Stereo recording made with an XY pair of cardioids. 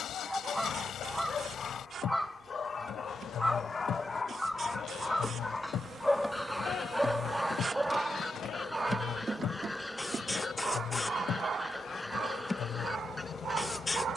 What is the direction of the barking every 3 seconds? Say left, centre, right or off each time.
left, left, centre, right, right.